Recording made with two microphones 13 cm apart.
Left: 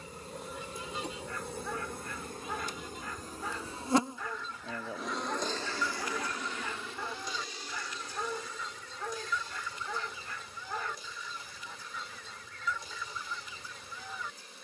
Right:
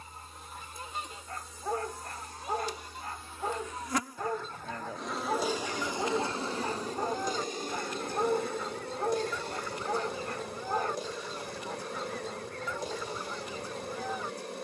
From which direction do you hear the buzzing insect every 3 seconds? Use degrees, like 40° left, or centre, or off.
60° left, 10° left, 40° right, 60° right, 60° right.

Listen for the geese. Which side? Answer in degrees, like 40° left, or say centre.
50° right.